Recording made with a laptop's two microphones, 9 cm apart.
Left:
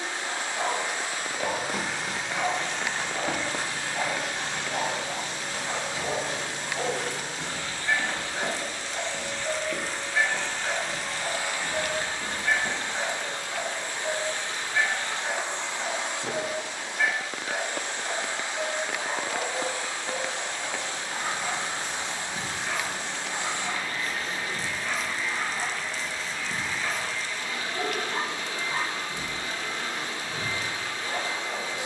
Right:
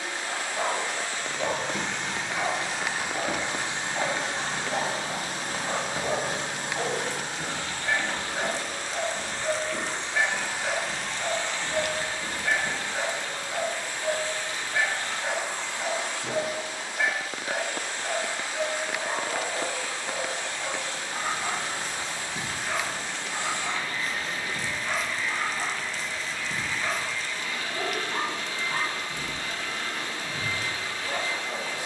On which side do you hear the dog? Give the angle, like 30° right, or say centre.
centre.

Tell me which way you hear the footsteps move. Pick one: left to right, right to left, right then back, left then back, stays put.
right then back.